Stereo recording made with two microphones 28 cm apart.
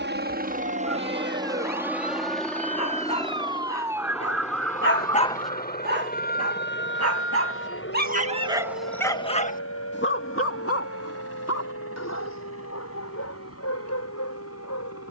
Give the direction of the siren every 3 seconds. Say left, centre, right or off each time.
right, centre, left, left, left.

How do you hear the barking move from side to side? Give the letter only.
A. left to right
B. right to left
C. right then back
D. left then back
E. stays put
C.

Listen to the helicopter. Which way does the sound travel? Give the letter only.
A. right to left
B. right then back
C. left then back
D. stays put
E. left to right
A.